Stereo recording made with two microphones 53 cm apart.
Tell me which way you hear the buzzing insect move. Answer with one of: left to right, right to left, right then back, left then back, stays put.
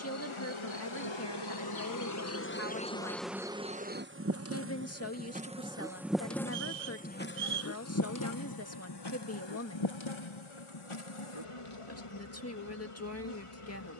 right then back.